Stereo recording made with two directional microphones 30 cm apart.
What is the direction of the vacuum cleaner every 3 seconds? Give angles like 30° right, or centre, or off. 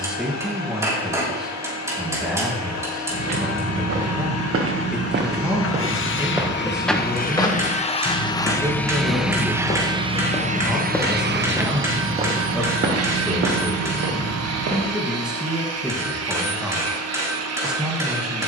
60° left, 50° left, 20° left, 20° right, 50° right, 50° right.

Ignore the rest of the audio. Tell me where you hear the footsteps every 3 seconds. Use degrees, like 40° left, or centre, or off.
off, 40° right, 10° left, 10° left, 40° right, off.